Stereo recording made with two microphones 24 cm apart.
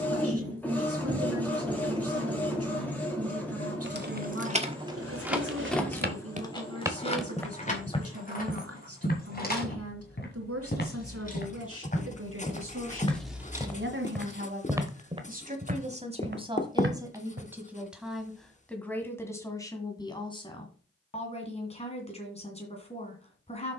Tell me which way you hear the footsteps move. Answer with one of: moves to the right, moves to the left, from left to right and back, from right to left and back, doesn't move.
from right to left and back.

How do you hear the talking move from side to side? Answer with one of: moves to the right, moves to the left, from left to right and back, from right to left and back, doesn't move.
moves to the left.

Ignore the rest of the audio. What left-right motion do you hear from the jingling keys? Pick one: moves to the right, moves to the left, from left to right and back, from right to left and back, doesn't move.
from right to left and back.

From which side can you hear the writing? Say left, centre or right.
left.